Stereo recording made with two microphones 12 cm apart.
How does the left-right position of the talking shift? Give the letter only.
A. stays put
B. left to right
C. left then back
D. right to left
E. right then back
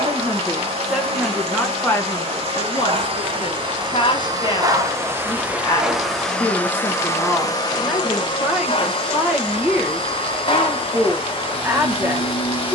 C.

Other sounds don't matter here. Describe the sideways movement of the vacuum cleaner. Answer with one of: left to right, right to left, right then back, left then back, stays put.
right to left.